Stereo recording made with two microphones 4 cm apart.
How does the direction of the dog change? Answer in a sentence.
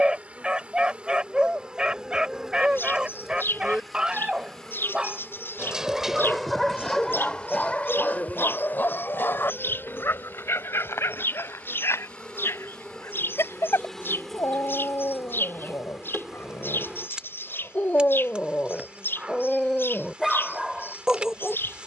You can hear the dog move from right to left and back again.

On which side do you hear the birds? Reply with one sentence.
You can hear the birds on the left.